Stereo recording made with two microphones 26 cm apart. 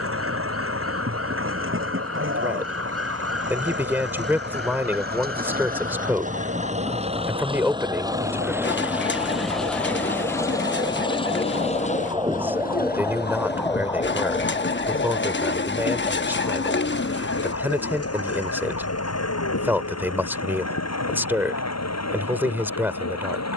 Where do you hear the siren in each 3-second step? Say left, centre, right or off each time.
right, right, right, right, centre, left, left, left.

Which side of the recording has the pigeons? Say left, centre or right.
left.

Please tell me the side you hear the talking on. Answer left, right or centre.
centre.